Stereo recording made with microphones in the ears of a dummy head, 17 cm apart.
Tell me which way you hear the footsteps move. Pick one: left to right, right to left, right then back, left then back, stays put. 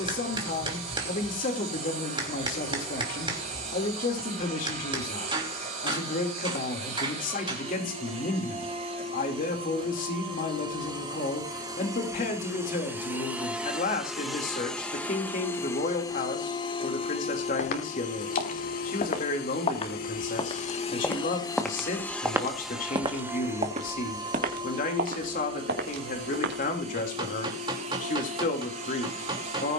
left to right.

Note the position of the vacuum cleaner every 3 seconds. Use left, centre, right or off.
right, right, right, right, centre, left, left, centre, right, right.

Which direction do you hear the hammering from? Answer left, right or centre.
right.